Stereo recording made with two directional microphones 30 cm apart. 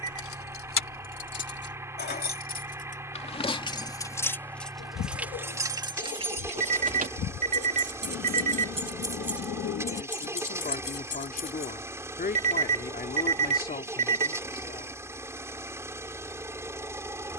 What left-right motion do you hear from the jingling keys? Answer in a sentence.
You can hear the jingling keys go right and come back.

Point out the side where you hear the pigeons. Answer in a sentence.
In this clip you hear the pigeons on the left.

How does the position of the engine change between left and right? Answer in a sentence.
In this clip you hear the engine stay in one place.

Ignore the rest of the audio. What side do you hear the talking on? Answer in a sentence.
You can hear the talking on the left.